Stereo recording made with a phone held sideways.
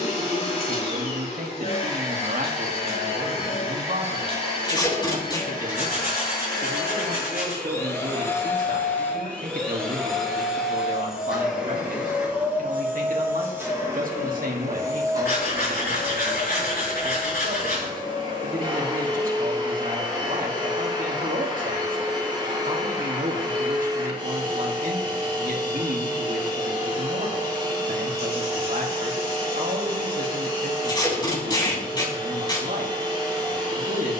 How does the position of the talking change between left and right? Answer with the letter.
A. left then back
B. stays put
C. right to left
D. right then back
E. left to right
B.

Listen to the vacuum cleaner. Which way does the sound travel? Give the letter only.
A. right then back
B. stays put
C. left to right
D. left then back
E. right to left
C.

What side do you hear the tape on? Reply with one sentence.
You can hear the tape on the left.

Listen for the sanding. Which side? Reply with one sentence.
You can hear the sanding on the left.